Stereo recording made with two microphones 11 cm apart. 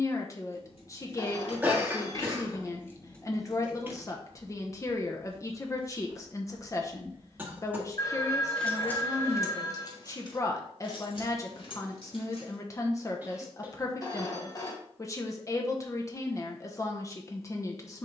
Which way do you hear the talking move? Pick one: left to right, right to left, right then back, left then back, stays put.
stays put.